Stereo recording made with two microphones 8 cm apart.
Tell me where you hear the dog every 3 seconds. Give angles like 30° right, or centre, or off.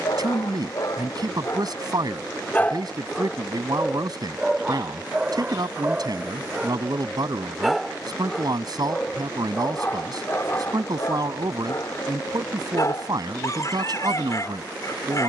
40° left, 10° right, centre, 30° left, 40° left.